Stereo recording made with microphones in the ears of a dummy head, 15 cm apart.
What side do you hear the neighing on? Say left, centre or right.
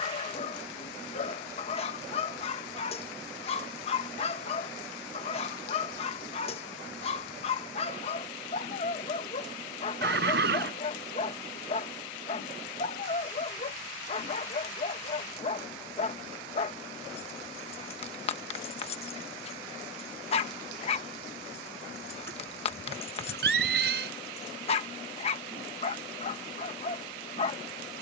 right.